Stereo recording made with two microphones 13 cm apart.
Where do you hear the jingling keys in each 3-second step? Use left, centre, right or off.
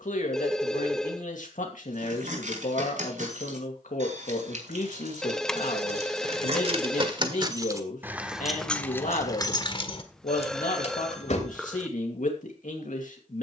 right, right, right, left, off.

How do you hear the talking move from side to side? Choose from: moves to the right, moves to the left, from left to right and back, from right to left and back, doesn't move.
doesn't move.